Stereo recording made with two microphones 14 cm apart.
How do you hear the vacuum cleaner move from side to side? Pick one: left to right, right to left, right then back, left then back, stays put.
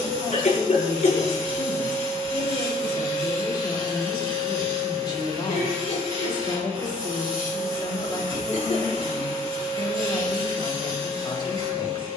stays put.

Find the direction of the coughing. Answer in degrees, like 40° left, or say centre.
70° left.